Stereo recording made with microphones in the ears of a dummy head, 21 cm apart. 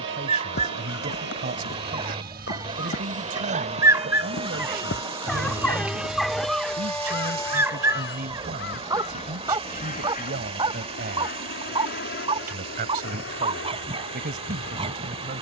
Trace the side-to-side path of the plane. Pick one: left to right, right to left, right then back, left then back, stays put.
right to left.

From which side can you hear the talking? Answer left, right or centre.
right.